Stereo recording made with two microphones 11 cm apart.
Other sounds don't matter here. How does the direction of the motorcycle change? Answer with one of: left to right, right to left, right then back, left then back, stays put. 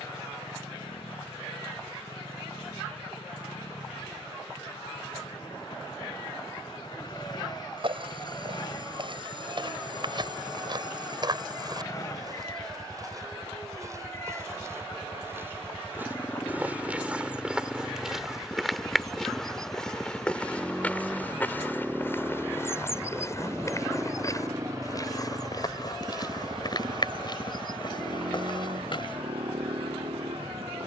left to right.